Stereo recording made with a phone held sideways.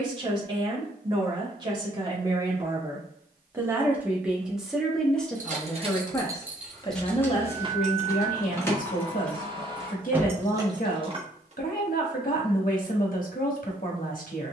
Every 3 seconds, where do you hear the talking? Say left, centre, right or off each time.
right, centre, left, left, left.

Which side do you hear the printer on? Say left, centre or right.
right.